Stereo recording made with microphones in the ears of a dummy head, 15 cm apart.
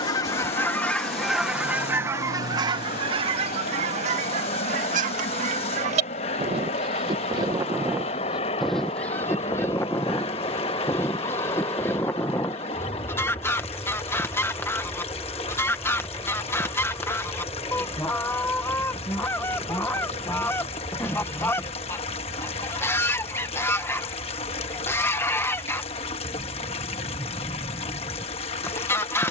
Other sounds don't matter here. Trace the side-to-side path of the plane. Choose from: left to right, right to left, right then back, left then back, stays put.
left to right.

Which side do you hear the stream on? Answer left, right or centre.
left.